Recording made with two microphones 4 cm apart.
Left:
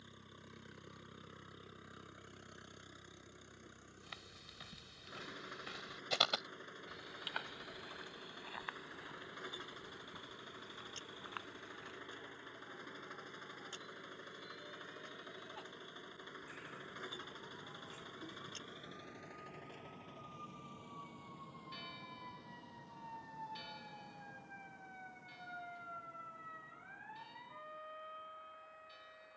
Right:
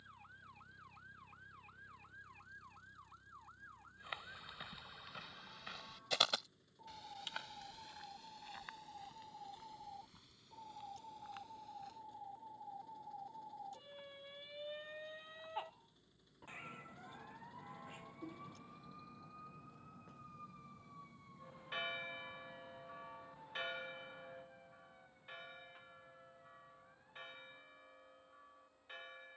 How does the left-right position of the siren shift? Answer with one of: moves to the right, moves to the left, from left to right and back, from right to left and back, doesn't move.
moves to the left.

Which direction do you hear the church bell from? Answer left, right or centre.
right.